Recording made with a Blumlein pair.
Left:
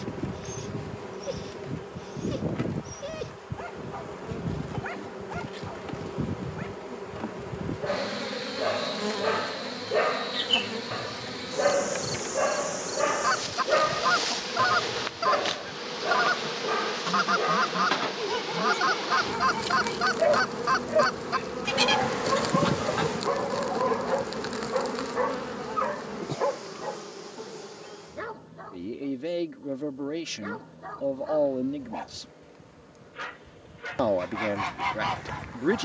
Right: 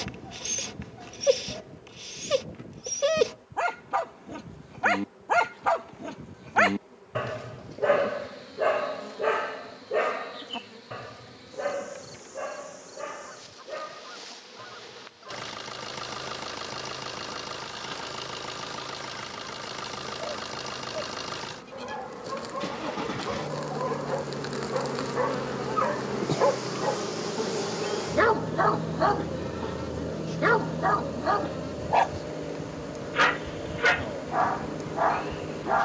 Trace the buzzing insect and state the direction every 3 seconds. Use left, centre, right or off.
left, left, left, left, left, left, left, left, centre, right, right, right.